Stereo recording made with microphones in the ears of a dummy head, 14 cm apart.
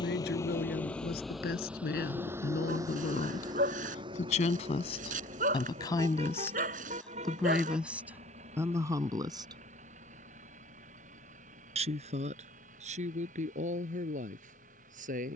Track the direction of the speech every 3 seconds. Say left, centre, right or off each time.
left, left, centre, right, right.